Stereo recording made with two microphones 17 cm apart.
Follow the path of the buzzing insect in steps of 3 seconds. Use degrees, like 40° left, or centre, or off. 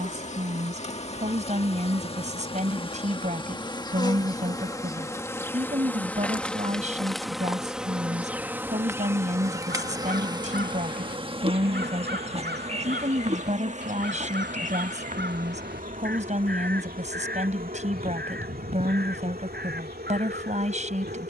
40° left, 20° left, centre, 30° right, 40° right, 60° right, 60° right.